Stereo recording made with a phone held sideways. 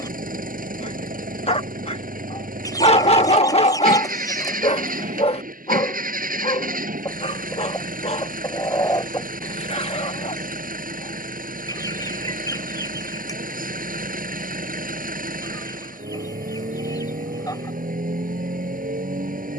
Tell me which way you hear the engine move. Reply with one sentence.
In this clip you hear the engine stay in one place.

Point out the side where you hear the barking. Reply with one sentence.
You can hear the barking on the left.